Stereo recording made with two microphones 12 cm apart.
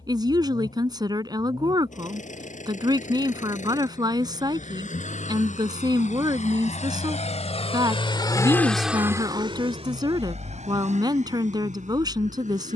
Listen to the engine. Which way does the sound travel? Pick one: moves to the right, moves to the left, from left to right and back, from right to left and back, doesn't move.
moves to the right.